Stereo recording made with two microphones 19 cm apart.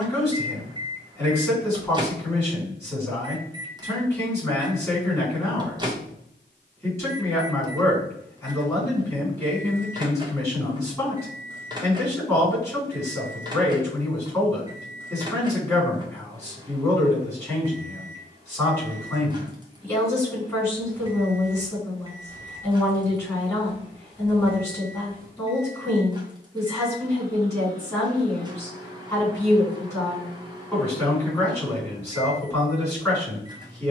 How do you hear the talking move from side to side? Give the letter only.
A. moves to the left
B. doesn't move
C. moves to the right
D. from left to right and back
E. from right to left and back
B.